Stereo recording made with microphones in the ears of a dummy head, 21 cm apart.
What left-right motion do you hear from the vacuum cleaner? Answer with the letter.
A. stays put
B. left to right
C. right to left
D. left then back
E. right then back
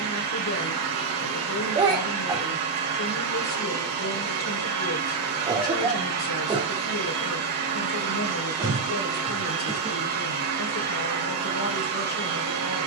A.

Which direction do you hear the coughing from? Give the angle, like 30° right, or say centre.
20° right.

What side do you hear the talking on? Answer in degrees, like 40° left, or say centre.
60° left.